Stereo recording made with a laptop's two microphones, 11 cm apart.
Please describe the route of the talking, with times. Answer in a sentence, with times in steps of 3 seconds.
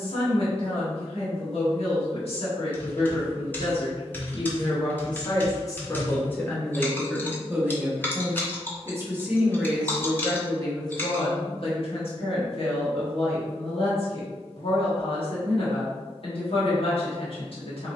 You can hear the talking on the left from 0 s, in the centre from 6 s and on the left from 9 s.